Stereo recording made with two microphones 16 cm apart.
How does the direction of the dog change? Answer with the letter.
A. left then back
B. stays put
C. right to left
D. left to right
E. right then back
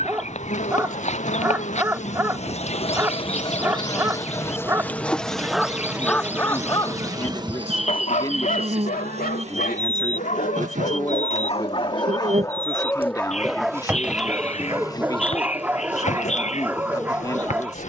A.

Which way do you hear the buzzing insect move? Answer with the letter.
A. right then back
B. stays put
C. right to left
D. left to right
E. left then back
A.